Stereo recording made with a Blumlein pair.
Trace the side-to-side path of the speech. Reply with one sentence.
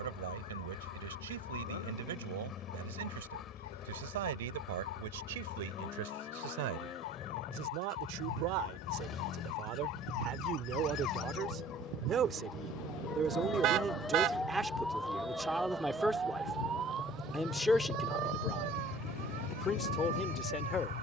You can hear the speech move to the left.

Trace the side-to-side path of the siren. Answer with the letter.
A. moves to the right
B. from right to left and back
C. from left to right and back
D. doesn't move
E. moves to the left
A.